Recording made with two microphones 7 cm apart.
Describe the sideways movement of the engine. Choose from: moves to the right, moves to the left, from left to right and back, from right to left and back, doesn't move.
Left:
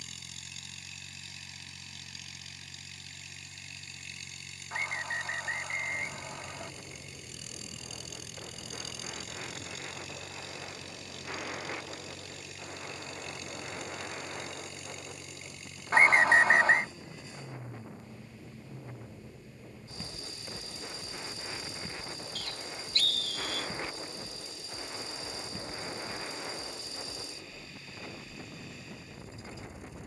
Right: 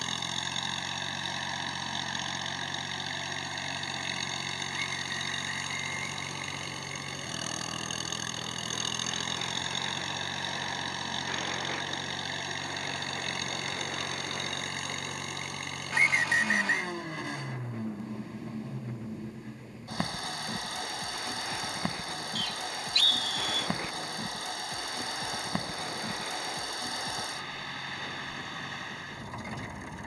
doesn't move.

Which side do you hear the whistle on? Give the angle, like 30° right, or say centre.
40° left.